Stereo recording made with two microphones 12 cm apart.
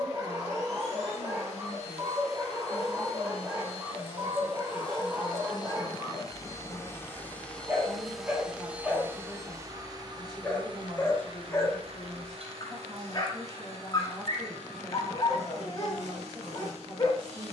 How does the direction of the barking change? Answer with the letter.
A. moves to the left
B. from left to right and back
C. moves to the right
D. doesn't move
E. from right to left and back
A.